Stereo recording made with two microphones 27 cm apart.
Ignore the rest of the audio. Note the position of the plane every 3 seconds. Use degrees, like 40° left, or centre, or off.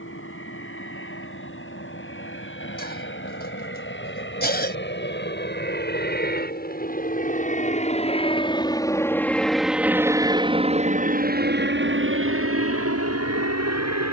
60° left, 50° left, 30° left, 20° right, 60° right.